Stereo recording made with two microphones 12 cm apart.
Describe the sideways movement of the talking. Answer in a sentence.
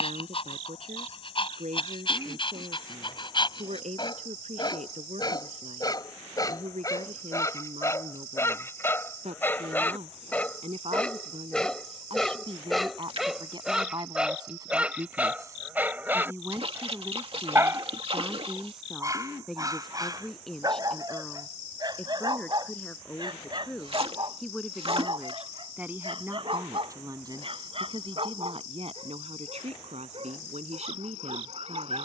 You can hear the talking move from right to left and back again.